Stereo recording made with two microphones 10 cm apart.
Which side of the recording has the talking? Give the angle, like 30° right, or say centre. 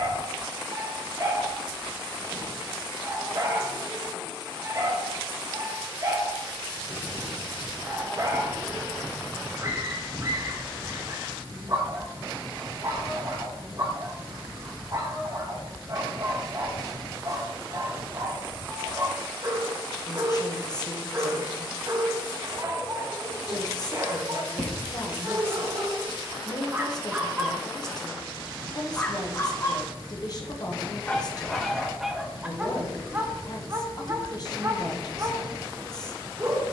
40° left.